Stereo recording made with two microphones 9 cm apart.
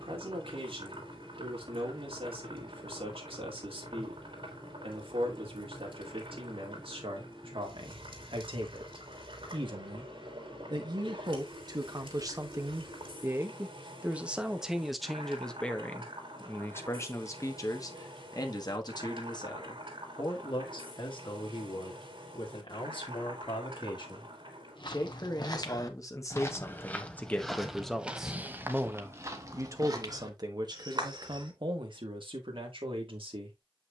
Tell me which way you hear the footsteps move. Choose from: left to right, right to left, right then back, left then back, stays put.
left to right.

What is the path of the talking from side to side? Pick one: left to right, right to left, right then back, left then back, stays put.
left then back.